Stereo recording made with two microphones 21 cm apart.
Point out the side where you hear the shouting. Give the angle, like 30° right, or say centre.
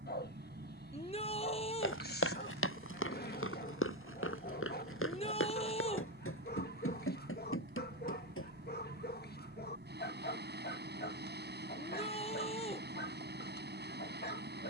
30° left.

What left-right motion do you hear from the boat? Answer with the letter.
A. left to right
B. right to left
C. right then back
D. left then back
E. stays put
E.